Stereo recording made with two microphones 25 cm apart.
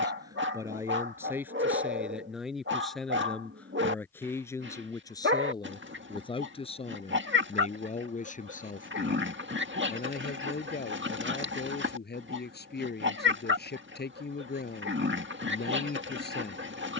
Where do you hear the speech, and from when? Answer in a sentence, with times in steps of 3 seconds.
In this clip you hear the speech in the centre from 0 s and on the left from 6 s.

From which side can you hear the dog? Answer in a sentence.
You can hear the dog on the right.